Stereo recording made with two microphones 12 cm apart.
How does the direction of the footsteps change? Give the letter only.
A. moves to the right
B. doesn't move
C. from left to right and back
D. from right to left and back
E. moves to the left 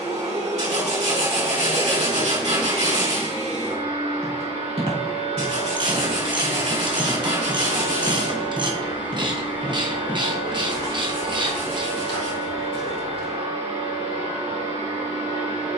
E.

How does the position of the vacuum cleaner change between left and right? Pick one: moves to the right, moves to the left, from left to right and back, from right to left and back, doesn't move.
doesn't move.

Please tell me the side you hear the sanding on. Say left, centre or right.
right.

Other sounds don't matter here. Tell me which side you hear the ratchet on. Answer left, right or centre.
right.